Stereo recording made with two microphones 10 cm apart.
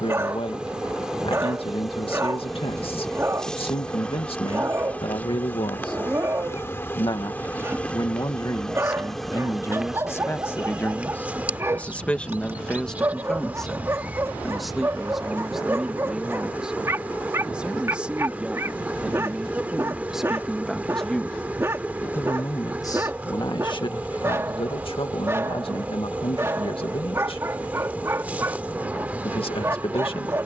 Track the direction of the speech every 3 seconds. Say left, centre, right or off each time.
left, left, left, left, centre, centre, centre, left, left, left.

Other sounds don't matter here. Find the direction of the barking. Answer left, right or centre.
right.